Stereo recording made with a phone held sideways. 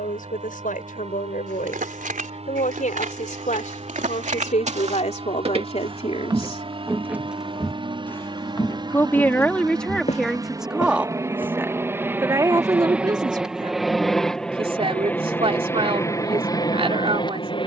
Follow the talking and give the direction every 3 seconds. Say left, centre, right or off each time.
left, left, left, centre, right, right.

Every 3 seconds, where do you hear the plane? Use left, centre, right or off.
right, right, right, right, centre, left.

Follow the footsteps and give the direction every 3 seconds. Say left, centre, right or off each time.
right, right, centre, left, off, off.